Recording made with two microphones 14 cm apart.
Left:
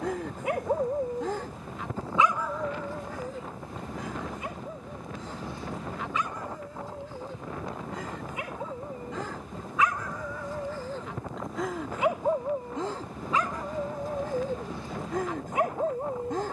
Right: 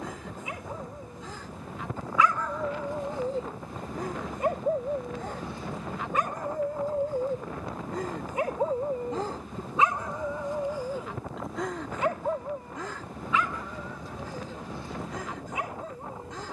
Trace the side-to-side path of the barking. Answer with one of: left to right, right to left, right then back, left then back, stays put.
right then back.